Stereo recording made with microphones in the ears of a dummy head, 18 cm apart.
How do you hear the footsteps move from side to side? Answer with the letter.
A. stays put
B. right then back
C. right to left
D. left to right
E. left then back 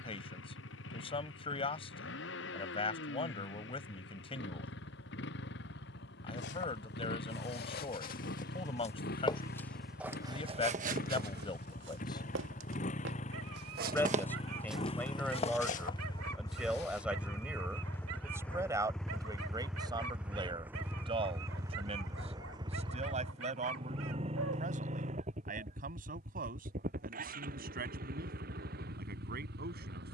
B.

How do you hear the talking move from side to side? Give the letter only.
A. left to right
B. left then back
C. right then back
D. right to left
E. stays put
A.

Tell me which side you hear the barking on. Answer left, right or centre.
right.